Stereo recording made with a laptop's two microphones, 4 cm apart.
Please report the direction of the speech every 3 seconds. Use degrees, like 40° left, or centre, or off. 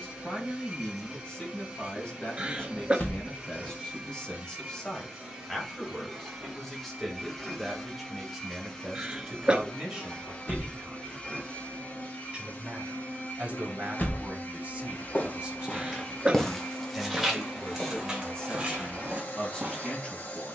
20° left, 10° left, centre, 20° right, 40° right, 10° right, 20° left.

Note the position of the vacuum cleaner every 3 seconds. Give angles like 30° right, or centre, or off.
20° right, 20° right, centre, 20° left, 40° left, 50° left, 50° left.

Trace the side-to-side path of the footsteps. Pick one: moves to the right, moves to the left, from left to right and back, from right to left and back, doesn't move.
moves to the right.